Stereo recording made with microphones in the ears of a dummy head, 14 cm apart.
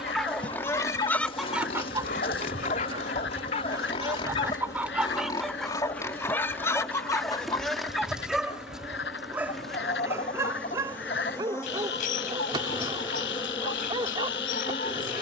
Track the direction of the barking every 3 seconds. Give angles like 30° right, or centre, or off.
30° left, 30° left, 10° left, 20° right, 30° right.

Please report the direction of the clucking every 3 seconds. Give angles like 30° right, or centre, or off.
10° right, 10° right, 20° left, 50° left, 50° left.